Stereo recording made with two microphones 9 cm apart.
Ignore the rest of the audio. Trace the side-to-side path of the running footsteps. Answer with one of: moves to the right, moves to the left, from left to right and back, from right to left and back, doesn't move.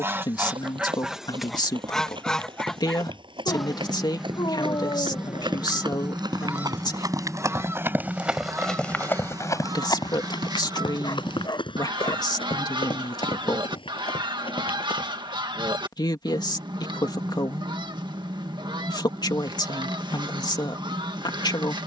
moves to the left.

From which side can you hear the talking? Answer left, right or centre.
left.